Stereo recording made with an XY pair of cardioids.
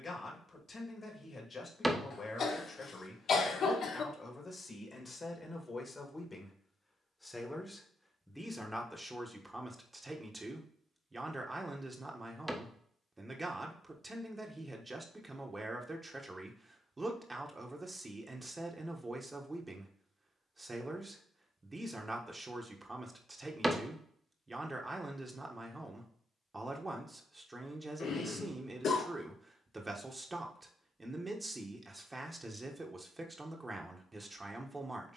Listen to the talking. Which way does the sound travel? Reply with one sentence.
You can hear the talking travel towards the right.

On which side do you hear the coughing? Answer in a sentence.
You can hear the coughing on the left.